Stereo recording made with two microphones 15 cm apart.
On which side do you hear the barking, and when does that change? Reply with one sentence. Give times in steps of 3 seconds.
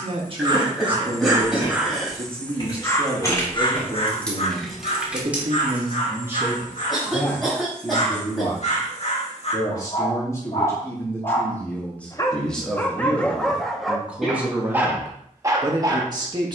In this clip you hear the barking in the centre from 0 s, on the left from 3 s, in the centre from 12 s and on the right from 15 s.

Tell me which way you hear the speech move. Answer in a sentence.
You can hear the speech move from right to left and back again.